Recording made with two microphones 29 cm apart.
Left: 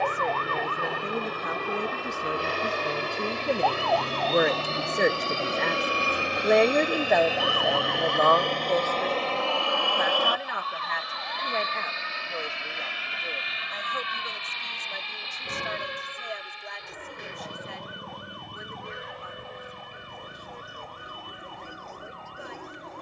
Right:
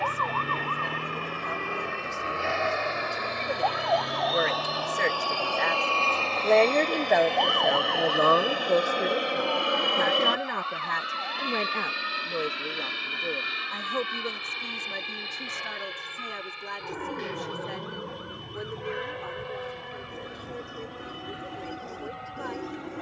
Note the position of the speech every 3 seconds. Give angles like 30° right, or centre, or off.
80° left, 50° left, 10° right, 50° right, 70° right, 70° right, 70° right, 80° right.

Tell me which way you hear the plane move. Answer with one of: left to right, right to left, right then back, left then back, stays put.
left to right.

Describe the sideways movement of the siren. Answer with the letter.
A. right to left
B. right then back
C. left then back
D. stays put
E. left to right
A.